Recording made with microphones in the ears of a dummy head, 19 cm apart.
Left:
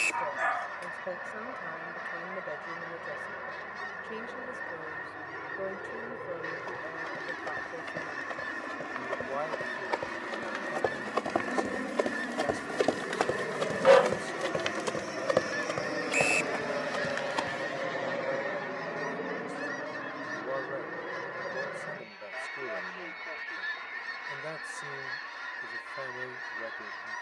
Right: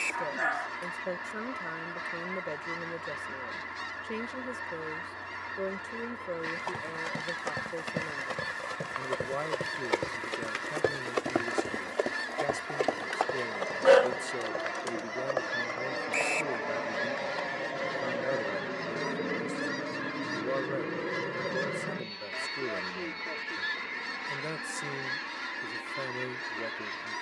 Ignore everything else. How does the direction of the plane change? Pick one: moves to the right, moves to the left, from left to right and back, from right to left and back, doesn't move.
moves to the right.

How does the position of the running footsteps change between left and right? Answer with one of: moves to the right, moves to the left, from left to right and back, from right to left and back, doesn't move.
moves to the left.